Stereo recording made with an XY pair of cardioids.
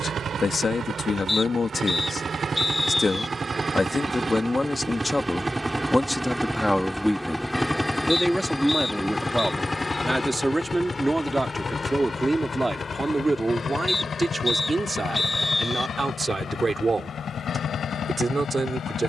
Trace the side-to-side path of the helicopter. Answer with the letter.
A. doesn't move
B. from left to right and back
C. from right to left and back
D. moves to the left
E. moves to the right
D.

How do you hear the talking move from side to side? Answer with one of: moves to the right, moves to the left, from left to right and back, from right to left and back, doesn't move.
moves to the right.